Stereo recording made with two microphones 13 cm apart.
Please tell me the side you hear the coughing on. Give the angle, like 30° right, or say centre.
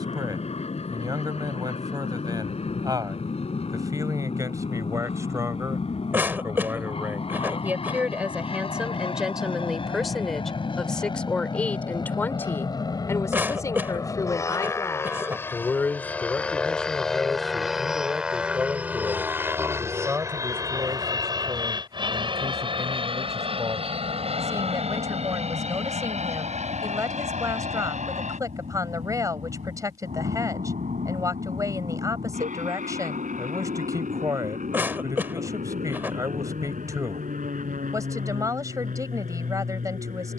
20° right.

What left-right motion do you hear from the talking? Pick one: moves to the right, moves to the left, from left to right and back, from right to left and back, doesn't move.
from right to left and back.